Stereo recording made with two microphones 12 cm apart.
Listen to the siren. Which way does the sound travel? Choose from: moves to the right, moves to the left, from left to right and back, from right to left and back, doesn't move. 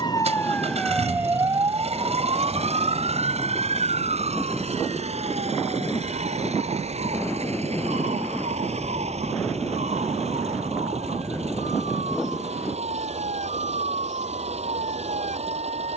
moves to the right.